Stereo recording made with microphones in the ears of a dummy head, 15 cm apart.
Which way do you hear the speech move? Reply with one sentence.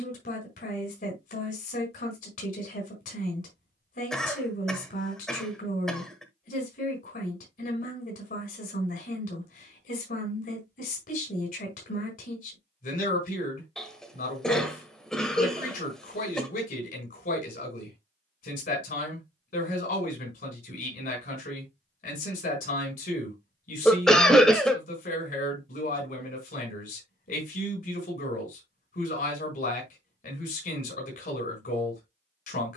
You can hear the speech stay put.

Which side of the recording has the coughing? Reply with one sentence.
You can hear the coughing in the centre.